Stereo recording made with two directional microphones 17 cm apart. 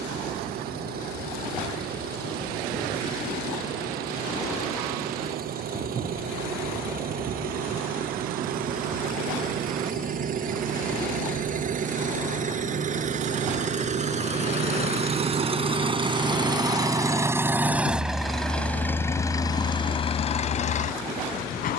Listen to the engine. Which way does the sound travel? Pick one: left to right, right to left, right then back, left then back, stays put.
right to left.